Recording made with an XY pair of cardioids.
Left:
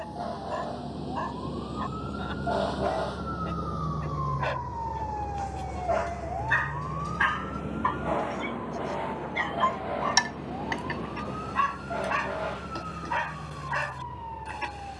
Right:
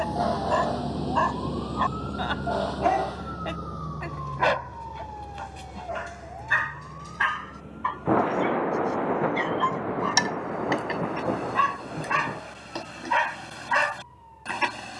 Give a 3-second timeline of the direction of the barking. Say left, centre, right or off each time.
right, right, centre, centre, right.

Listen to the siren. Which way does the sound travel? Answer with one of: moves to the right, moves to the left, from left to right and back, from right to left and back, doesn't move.
moves to the left.